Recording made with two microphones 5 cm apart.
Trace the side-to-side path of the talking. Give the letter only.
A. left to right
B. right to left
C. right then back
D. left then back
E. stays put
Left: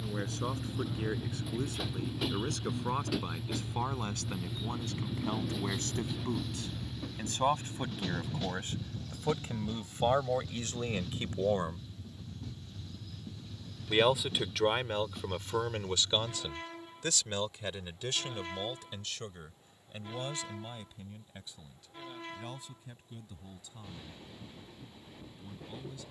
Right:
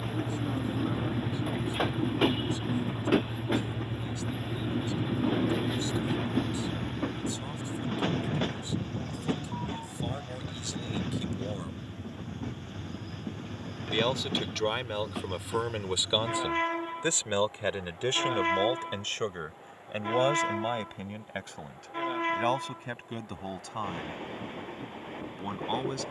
A.